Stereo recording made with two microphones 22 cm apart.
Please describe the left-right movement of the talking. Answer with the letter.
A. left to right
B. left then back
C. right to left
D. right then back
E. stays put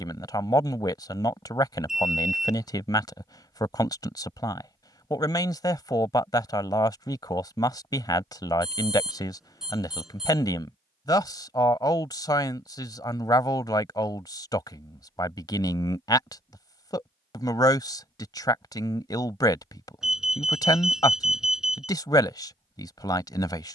E.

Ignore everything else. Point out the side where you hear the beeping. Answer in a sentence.
You can hear the beeping in the centre.